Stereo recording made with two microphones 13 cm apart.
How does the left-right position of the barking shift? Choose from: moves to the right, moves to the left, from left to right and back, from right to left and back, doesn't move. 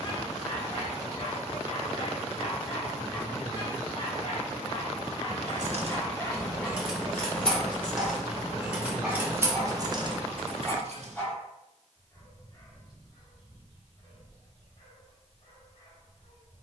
from left to right and back.